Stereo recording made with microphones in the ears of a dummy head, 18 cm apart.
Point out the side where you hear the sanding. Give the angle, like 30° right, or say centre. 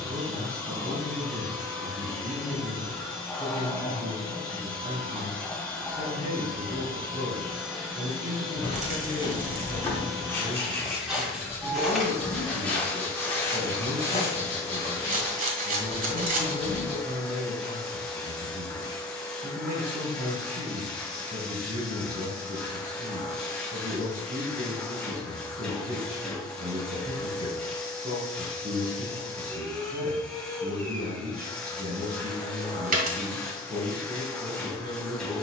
10° left.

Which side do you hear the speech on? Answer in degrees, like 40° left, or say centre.
30° right.